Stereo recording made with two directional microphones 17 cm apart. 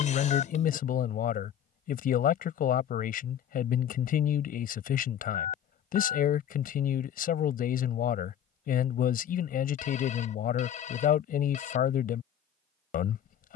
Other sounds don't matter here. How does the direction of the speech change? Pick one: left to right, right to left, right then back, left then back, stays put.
stays put.